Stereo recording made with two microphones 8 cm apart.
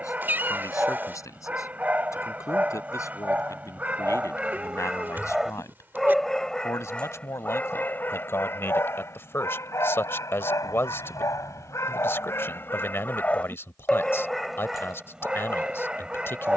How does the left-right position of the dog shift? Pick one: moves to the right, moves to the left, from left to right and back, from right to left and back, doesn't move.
from right to left and back.